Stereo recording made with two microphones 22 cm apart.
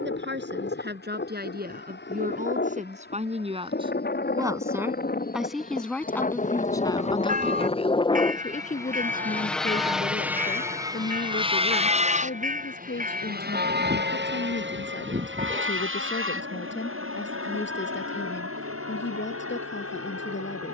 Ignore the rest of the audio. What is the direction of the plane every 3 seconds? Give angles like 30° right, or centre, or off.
60° left, 50° left, 30° left, 10° right, 40° right, 60° right, 70° right.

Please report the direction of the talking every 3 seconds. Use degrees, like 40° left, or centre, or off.
50° right, 10° right, 20° left, 50° left, 60° left, 60° left, 60° left.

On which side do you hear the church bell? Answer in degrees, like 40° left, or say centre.
40° right.